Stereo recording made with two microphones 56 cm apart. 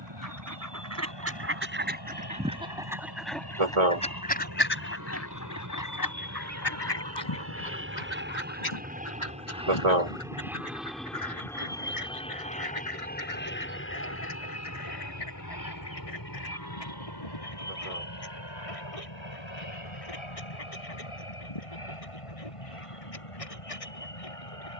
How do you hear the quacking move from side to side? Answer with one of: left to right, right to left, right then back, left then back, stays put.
right to left.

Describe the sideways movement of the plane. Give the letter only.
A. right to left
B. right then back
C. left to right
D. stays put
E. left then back
A.